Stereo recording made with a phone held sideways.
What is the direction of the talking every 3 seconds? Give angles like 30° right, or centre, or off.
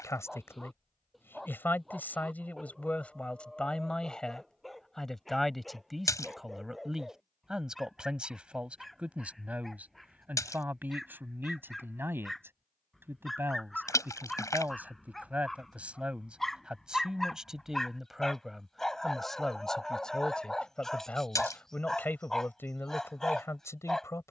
10° left, centre, centre, 10° right, 10° right, 10° right, centre, 10° left.